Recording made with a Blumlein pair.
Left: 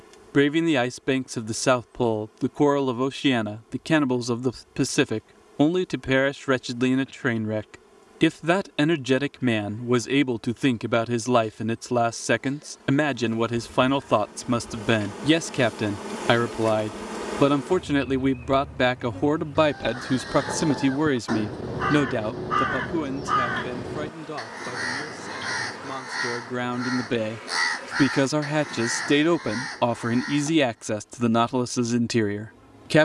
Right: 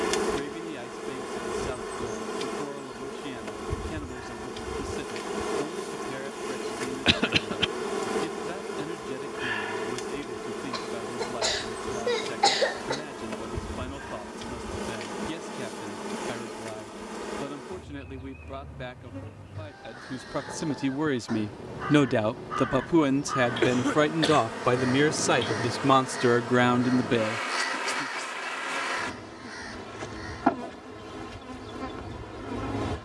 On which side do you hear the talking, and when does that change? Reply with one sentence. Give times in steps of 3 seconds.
You can hear the talking on the left from 0 s, in the centre from 21 s, on the right from 24 s and on the left from 27 s.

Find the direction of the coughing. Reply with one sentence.
In this clip you hear the coughing on the right.